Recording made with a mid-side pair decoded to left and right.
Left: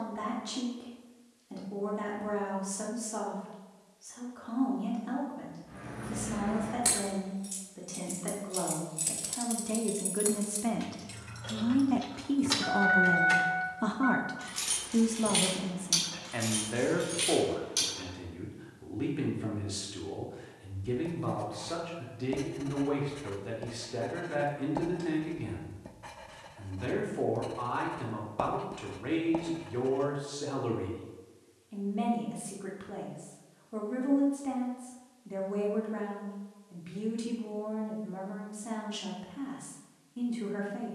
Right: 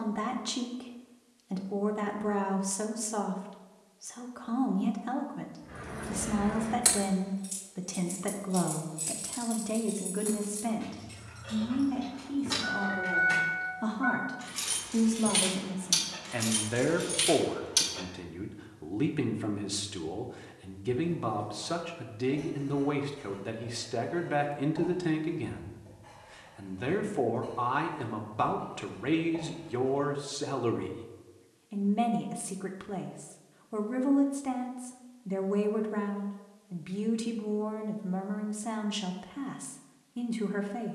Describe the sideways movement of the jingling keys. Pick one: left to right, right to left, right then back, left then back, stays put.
left then back.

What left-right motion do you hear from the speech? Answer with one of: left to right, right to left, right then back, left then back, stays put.
left then back.